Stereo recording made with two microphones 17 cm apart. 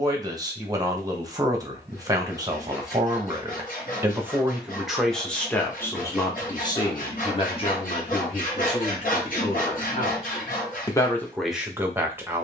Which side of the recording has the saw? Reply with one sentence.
You can hear the saw on the left.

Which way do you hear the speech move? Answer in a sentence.
In this clip you hear the speech move from right to left and back again.